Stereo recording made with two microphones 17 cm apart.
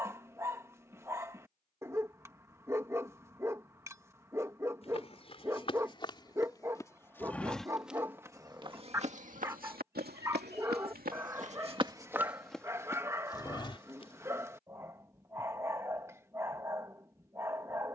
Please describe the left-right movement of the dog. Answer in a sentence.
You can hear the dog stay put.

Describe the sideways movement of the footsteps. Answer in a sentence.
In this clip you hear the footsteps go right and come back.